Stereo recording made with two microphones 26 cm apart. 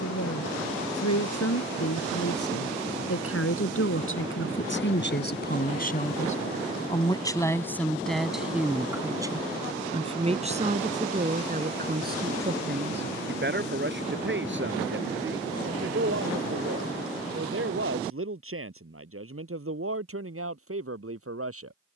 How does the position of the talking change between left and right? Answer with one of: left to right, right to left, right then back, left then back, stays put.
left to right.